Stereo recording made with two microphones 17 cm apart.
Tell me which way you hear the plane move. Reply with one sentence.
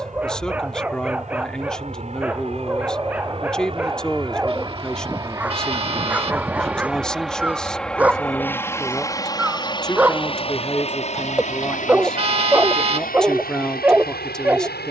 In this clip you hear the plane move to the left.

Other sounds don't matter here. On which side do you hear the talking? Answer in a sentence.
You can hear the talking in the centre.